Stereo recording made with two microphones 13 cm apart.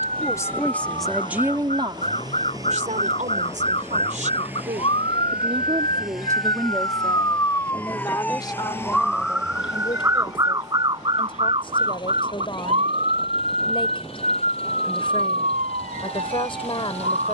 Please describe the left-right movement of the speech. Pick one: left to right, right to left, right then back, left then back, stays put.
right then back.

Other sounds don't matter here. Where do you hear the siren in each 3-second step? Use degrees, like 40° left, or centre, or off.
60° left, 50° left, 20° left, 30° right, 60° right, 70° right.